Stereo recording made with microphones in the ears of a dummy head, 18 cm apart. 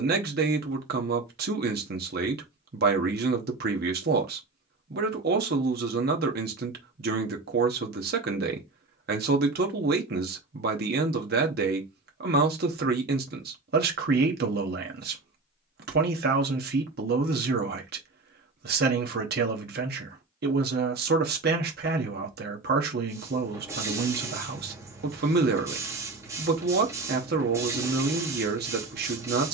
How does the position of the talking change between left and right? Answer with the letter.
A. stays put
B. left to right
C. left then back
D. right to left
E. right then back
A.